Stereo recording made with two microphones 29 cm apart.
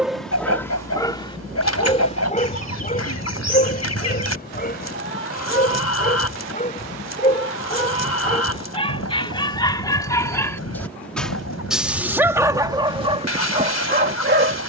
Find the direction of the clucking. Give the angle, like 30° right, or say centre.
60° left.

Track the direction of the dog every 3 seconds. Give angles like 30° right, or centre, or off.
20° left, 30° left, 20° left, 10° left, 20° right.